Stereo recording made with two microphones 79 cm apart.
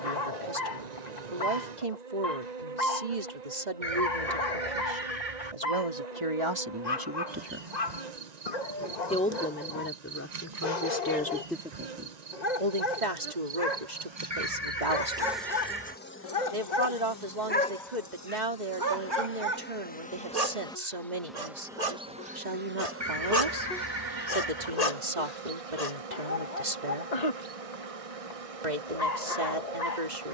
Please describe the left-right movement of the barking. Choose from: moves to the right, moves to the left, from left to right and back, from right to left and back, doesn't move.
from left to right and back.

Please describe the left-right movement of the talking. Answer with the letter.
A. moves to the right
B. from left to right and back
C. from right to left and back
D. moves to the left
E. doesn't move
C.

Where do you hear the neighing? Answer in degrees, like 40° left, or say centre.
50° right.